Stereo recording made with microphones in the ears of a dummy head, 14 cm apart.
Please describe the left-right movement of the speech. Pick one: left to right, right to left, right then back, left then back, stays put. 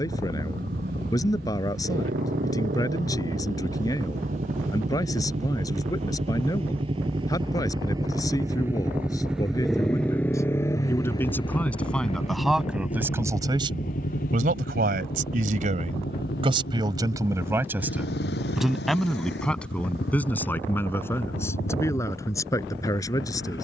right then back.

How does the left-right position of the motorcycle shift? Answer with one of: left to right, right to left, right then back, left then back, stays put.
right to left.